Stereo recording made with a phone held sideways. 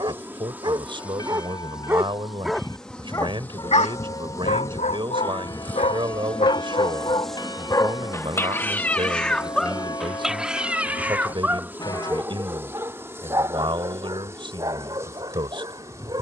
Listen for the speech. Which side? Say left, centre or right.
right.